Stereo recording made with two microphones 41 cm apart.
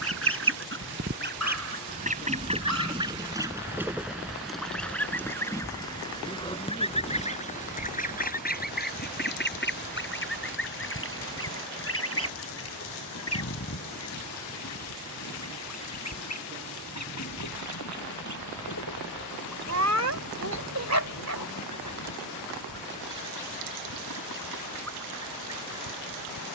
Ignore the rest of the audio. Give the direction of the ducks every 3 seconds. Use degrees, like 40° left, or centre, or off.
20° right, centre, 20° left, 30° left, 40° left, 40° left, 40° left, 50° left, 50° left.